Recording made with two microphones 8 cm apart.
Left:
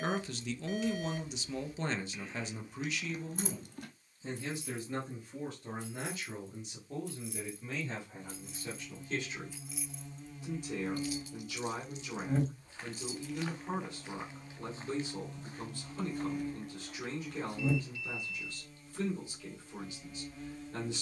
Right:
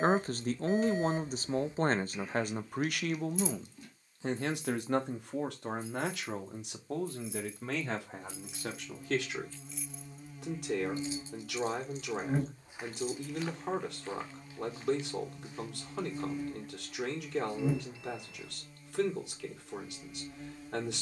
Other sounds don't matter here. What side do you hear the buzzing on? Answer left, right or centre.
centre.